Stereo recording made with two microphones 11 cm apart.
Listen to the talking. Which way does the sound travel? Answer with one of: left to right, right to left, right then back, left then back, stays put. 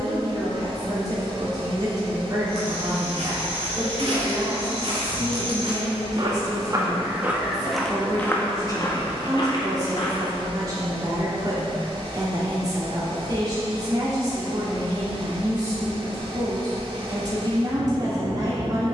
stays put.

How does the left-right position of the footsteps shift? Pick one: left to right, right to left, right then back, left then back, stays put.
right to left.